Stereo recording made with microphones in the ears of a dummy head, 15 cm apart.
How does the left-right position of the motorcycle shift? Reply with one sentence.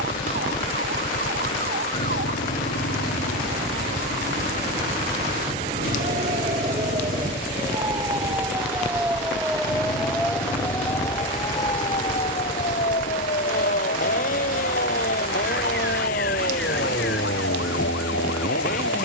You can hear the motorcycle stay in one place.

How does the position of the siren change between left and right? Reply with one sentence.
You can hear the siren go from the right side to the left.